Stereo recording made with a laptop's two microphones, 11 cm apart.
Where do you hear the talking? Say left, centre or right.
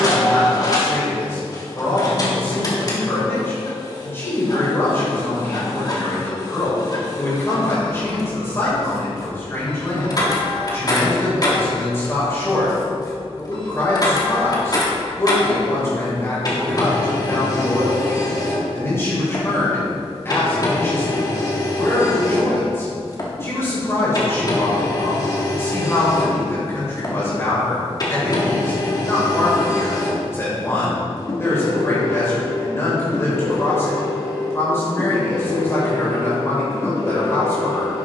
left.